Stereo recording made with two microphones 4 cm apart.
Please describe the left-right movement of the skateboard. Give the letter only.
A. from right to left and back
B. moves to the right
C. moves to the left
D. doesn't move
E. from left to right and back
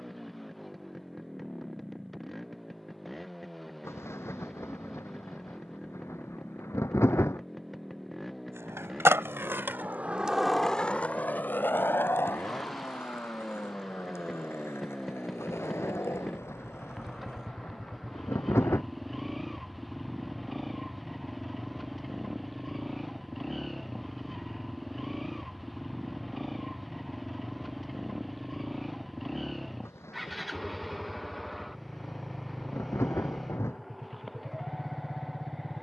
C.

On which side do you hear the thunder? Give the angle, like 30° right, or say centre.
80° left.